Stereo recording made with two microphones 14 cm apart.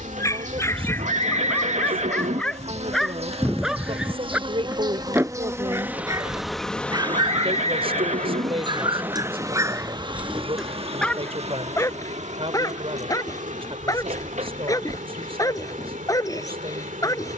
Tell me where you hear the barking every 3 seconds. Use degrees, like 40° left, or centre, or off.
10° left, 10° right, 30° right, 10° right, 20° left, 20° left.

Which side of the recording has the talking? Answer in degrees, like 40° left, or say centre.
40° right.